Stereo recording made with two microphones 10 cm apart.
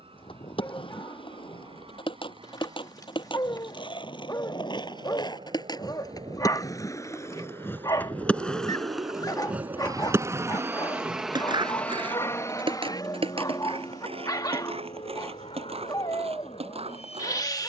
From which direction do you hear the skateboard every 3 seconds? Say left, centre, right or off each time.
left, left, left, right, right, right.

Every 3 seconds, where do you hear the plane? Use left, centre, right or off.
right, right, right, right, left, left.